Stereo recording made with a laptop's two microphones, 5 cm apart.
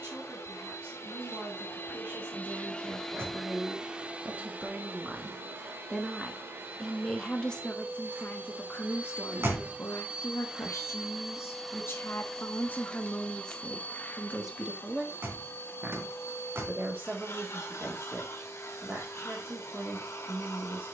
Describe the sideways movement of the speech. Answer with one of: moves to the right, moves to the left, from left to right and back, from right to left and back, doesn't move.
from right to left and back.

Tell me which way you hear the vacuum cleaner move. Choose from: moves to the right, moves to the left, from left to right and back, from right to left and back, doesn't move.
from left to right and back.